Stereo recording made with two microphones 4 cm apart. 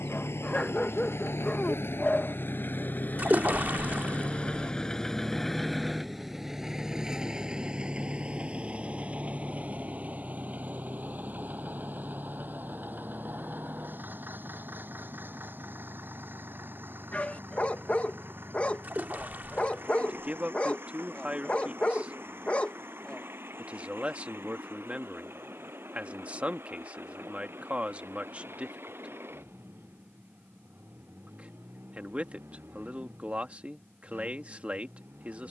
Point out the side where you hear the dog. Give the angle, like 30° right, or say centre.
30° left.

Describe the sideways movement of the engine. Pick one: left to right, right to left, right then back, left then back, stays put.
left to right.